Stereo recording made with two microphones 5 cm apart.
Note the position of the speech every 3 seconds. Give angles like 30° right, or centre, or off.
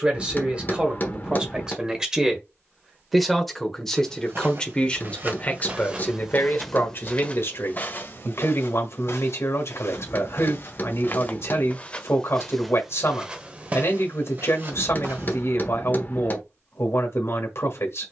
20° right, 20° left, 50° left, 60° left, 60° left, 60° left.